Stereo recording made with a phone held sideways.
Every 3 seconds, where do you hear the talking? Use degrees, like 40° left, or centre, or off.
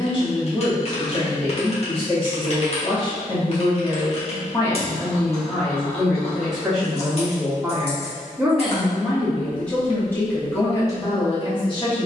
40° left, 20° left, centre, 20° left.